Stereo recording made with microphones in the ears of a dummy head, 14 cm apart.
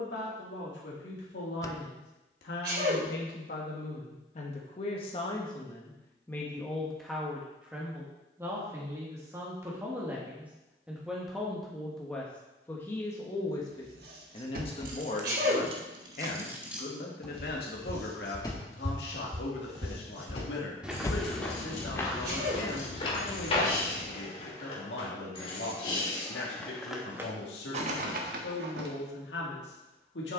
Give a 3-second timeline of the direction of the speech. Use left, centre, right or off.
left, left, centre, centre, left, left, left, left, left, left.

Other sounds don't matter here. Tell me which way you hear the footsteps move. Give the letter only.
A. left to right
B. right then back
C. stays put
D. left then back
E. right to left
E.